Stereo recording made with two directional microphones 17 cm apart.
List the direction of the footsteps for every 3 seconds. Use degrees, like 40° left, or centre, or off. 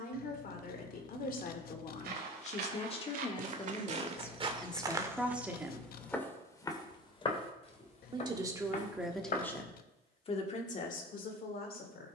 60° right, 30° right, 30° left, 50° left.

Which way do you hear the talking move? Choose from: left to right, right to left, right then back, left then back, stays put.
right then back.